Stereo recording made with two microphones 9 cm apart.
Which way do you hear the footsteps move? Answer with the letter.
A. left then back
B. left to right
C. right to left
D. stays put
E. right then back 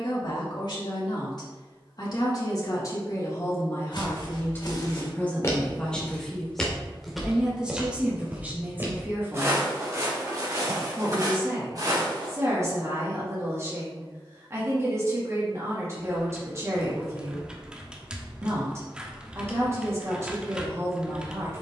B.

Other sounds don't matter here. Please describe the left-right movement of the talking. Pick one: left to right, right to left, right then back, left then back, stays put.
left to right.